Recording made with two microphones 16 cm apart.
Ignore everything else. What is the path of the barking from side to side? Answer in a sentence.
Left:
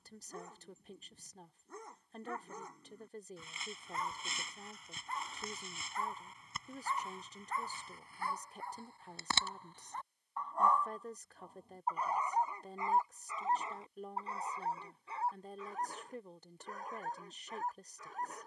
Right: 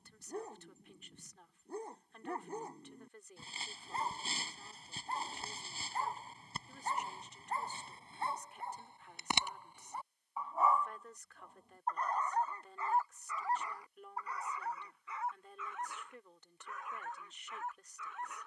In this clip you hear the barking move from right to left.